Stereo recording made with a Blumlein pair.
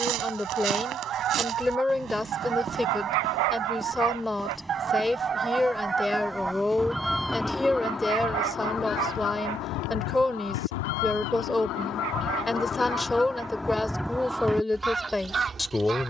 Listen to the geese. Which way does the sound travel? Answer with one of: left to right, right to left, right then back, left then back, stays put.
left then back.